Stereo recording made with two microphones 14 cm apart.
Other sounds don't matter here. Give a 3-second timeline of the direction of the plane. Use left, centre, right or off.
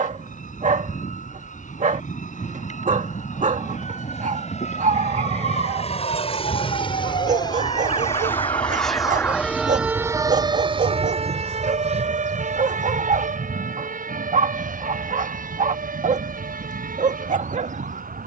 left, left, left, right, right, right.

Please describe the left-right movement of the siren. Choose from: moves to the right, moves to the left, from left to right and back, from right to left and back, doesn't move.
moves to the right.